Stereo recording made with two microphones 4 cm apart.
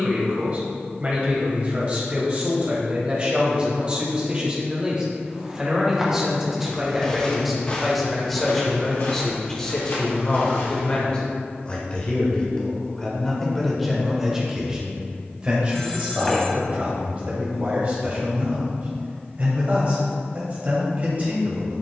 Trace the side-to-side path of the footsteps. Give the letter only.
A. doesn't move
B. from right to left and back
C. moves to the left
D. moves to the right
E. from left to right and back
C.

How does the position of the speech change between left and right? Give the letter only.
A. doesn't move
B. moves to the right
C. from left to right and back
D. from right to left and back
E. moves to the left
D.